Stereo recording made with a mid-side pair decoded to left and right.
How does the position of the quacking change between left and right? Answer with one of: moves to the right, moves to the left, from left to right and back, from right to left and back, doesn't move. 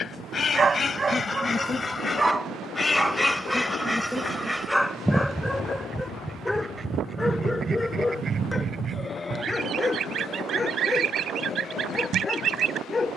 moves to the right.